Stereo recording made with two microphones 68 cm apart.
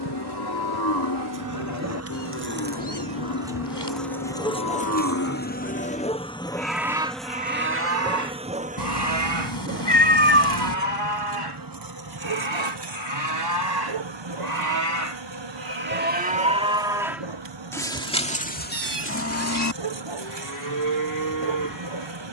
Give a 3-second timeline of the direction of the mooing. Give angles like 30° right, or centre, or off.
30° left, 30° left, 10° right, 40° right, 30° right, 10° right, 20° left, 30° left.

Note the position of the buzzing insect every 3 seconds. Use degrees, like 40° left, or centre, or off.
30° right, 10° left, centre, 20° right, 40° right, 40° right, 40° right, 40° right.